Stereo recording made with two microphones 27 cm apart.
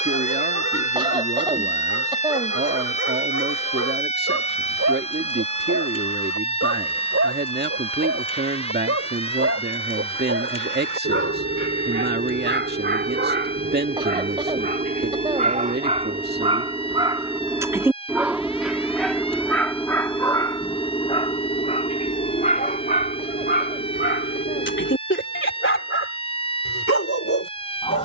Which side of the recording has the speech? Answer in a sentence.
You can hear the speech on the right.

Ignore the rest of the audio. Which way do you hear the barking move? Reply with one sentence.
You can hear the barking travel towards the left.